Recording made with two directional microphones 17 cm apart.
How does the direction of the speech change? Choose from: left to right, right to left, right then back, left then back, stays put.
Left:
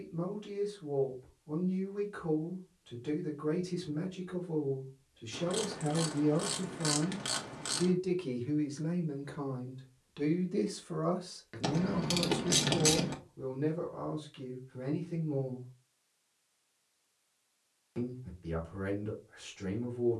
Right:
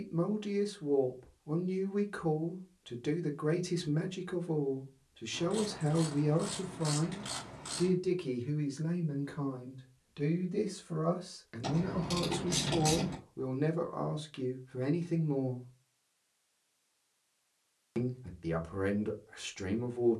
left then back.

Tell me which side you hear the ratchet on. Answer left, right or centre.
left.